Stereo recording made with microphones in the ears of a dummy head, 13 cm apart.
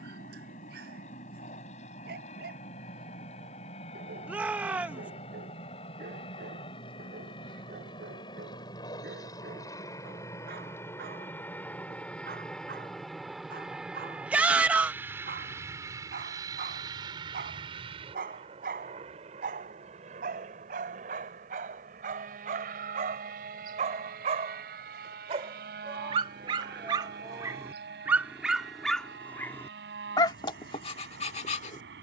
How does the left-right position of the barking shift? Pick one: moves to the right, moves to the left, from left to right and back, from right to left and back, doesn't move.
moves to the left.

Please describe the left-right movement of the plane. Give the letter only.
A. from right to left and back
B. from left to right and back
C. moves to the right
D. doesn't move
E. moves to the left
C.